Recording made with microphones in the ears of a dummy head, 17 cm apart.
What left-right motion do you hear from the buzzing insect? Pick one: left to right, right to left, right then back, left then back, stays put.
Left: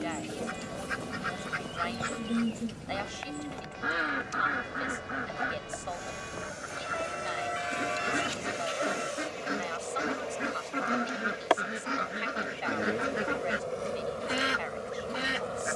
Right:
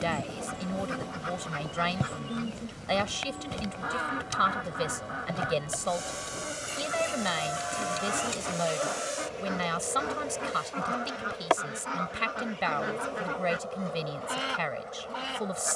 right to left.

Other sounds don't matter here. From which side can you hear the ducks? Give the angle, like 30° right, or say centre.
20° left.